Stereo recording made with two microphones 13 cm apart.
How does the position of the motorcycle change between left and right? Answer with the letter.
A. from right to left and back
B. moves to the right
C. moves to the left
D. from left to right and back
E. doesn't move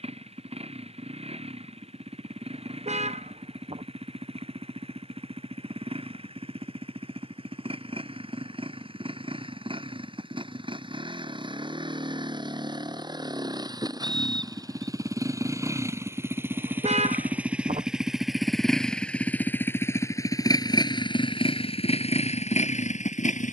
C.